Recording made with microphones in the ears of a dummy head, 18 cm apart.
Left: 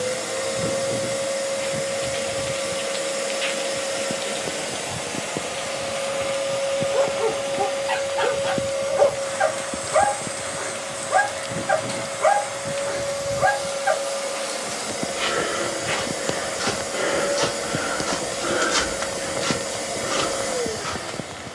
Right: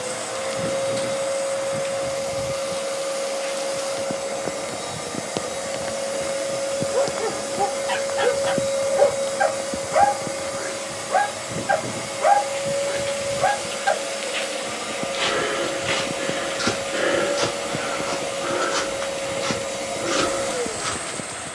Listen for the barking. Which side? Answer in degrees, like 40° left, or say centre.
centre.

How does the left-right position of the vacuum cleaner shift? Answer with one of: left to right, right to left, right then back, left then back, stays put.
right then back.